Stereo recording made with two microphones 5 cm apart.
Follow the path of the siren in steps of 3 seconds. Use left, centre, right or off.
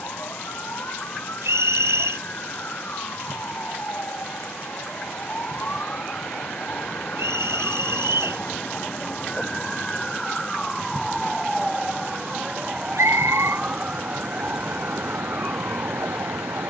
left, left, left, centre, right, right.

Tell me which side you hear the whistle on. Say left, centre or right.
right.